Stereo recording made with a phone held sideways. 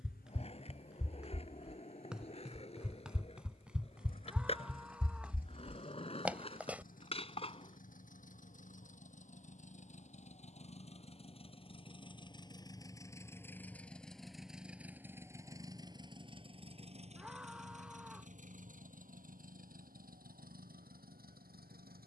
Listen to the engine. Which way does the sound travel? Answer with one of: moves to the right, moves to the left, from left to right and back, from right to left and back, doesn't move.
moves to the right.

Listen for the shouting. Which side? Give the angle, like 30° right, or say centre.
10° right.